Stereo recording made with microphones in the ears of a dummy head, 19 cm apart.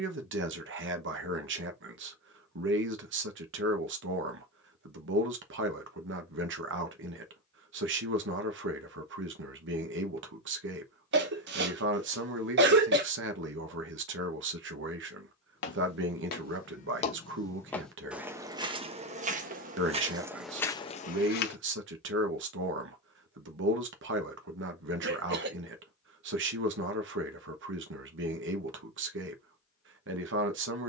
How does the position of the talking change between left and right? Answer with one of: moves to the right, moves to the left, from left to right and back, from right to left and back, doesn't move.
doesn't move.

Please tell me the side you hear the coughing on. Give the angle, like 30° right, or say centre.
50° right.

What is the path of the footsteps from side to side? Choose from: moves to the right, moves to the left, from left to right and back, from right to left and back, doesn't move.
from left to right and back.